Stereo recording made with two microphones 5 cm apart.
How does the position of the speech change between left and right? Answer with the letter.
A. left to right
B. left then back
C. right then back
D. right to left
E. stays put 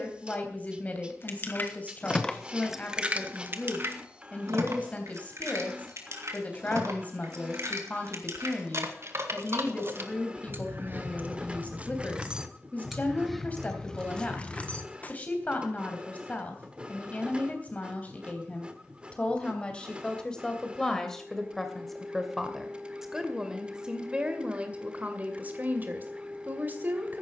A.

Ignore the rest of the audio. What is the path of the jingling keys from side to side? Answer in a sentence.
In this clip you hear the jingling keys move from left to right and back again.